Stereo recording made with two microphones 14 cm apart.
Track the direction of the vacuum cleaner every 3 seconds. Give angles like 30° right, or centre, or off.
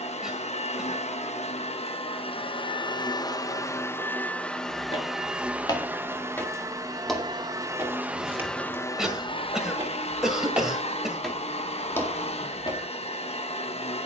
50° left, 10° left, 10° right, 50° left, 50° left.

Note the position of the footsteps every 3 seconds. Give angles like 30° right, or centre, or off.
off, 40° left, centre, 10° right, 30° left.